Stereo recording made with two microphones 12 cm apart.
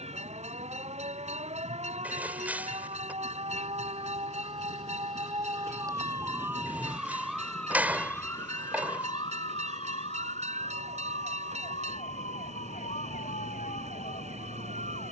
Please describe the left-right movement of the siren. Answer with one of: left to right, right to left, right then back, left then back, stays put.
right to left.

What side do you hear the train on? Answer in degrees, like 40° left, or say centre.
70° right.